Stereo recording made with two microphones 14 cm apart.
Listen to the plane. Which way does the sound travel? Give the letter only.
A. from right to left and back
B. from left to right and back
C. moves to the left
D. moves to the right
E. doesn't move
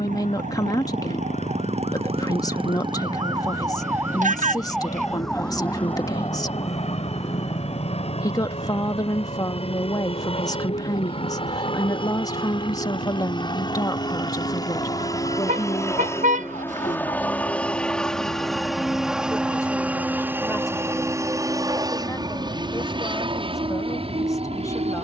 D.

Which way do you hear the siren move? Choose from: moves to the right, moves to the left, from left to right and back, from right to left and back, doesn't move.
moves to the left.